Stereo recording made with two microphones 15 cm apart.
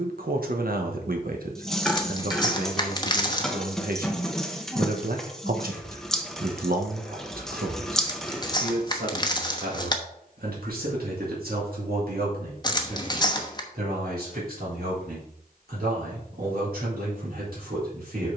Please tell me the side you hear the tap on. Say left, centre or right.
centre.